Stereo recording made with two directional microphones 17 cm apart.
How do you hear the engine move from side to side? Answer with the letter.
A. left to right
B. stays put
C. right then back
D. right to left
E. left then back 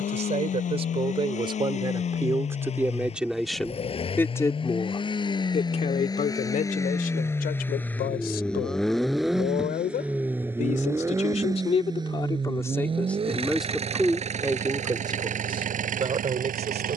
A.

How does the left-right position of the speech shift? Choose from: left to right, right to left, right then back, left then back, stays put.
left then back.